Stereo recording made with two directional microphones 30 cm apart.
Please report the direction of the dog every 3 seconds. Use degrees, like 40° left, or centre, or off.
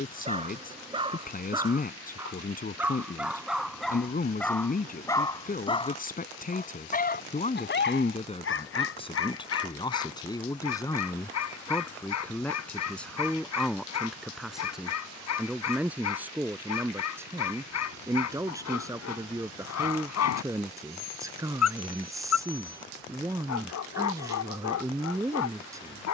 10° right, 10° left, 40° left, 60° left, 60° left, 60° left, 60° left, 60° left, 60° left.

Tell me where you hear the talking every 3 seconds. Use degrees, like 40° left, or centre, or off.
30° left, 30° left, 20° left, 10° left, centre, 10° right, 10° right, 10° right, 10° right.